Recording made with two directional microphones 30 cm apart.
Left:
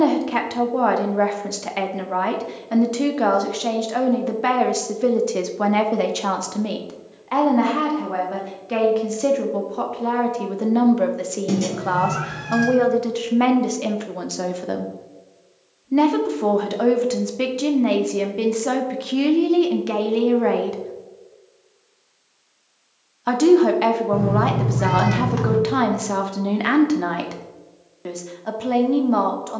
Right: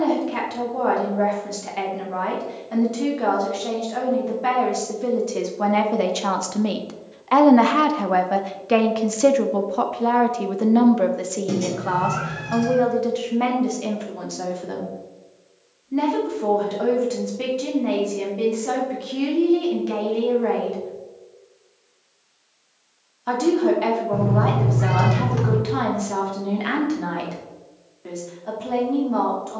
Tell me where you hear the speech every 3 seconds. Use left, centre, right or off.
left, left, right, centre, left, left, left, left, left, left.